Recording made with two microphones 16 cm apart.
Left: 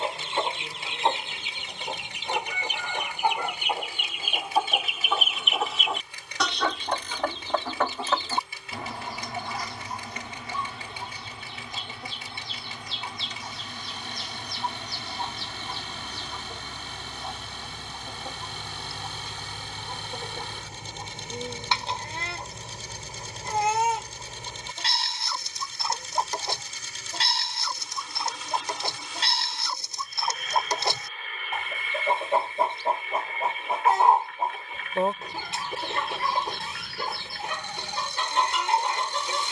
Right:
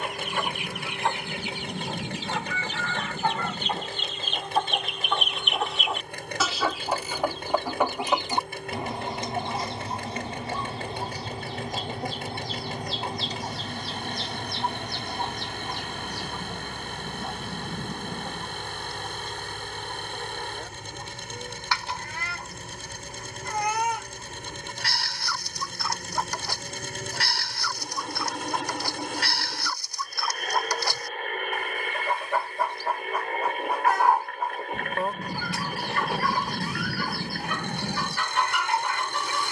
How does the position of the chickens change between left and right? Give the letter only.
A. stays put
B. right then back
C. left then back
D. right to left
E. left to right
B.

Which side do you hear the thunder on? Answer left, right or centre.
right.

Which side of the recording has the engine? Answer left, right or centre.
right.